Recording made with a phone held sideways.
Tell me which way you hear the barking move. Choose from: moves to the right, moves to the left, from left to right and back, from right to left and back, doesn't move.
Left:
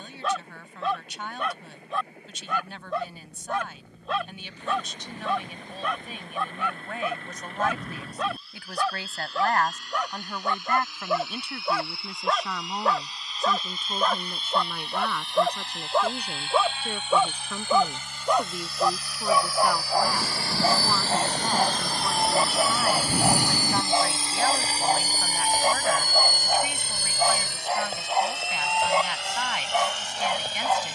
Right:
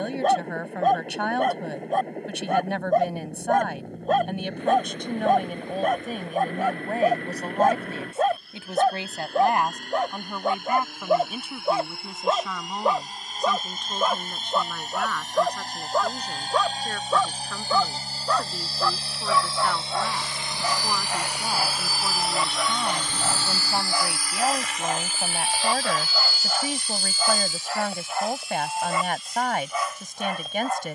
moves to the left.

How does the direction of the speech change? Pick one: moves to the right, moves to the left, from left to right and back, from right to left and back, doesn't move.
from right to left and back.